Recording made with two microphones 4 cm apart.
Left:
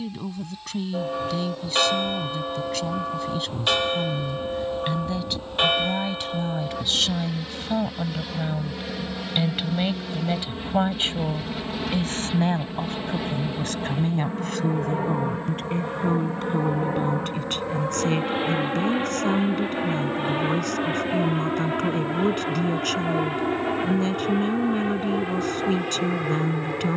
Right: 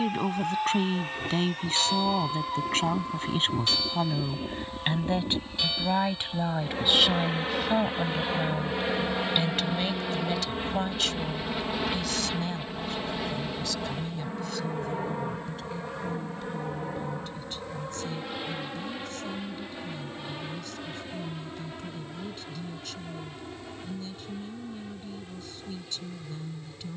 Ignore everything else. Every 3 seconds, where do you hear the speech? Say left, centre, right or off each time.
right, right, centre, left, left, left, left, left, left.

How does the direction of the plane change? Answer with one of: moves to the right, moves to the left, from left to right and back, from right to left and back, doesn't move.
moves to the left.